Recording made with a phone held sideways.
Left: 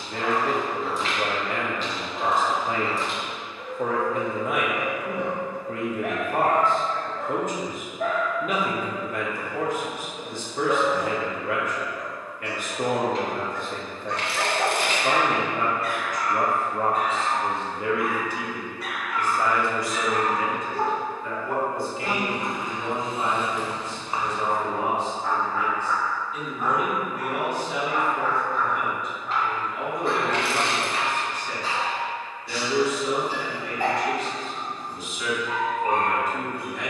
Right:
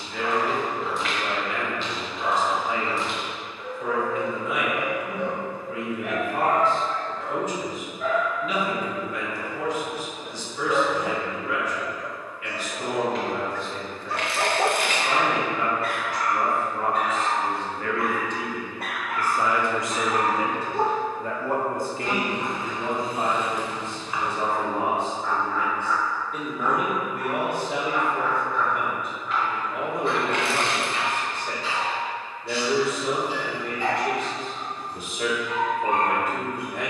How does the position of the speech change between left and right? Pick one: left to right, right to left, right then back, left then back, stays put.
left to right.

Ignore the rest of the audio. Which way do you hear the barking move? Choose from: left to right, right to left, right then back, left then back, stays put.
right then back.